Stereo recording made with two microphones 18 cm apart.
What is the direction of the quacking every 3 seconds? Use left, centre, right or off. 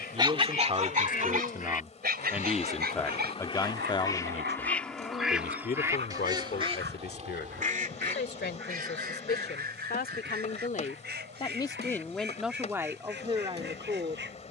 left, centre, right, right, right.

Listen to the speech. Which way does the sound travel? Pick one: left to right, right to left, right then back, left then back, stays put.
left then back.